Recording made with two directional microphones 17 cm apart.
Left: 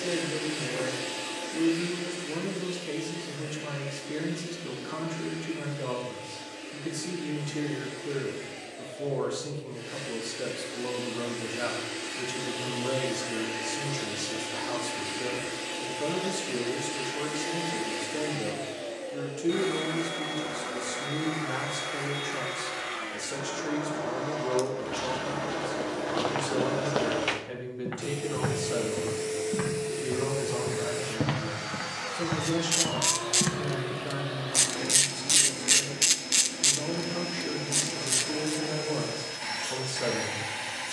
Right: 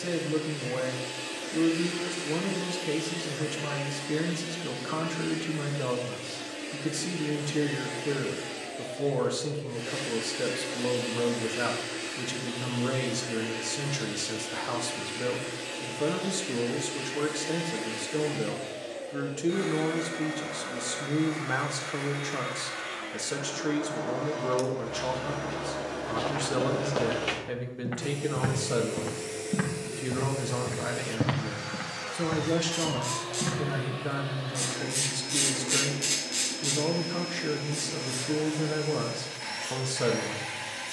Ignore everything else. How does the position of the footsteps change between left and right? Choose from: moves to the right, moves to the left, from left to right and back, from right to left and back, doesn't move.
from left to right and back.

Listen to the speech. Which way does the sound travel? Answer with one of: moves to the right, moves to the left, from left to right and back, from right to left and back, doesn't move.
doesn't move.